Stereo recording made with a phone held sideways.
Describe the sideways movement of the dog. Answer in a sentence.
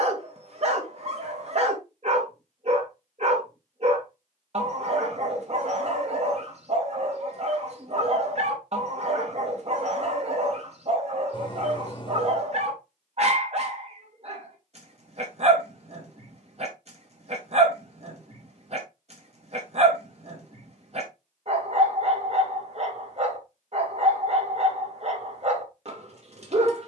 In this clip you hear the dog stay in one place.